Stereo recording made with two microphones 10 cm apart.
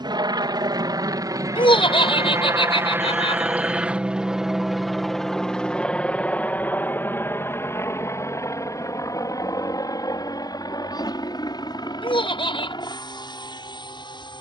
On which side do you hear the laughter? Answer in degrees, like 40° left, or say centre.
70° left.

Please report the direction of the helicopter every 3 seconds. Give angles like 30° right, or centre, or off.
40° right, centre, 20° left, 40° left, 50° left.